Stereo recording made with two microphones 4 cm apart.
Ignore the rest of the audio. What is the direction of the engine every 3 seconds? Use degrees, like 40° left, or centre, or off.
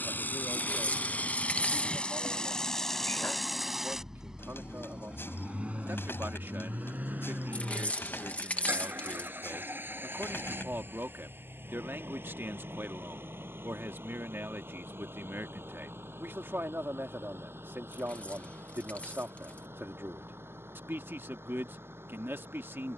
30° left, 20° right, 40° right, 60° right, 60° right, 70° right, 70° right, 70° right.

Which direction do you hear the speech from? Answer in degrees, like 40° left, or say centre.
70° right.